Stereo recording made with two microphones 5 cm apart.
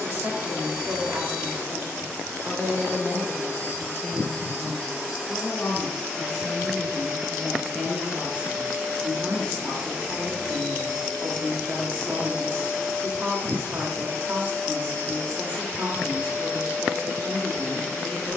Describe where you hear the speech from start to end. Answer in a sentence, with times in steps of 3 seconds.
You can hear the speech on the right from 0 s, in the centre from 3 s and on the right from 9 s.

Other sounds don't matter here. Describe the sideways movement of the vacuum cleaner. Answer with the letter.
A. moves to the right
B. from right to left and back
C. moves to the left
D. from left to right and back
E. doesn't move
D.